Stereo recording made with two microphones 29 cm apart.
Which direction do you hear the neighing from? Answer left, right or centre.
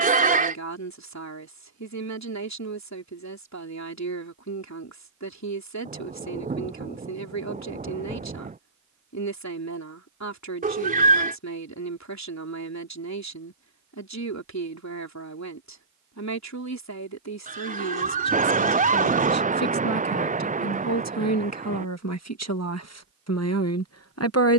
right.